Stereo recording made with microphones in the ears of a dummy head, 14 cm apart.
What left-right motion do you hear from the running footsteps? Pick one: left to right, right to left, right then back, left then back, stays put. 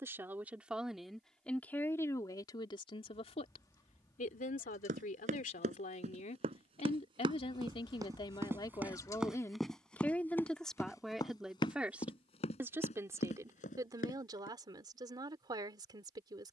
right to left.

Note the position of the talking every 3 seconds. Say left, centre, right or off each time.
centre, left, left, centre, right, right.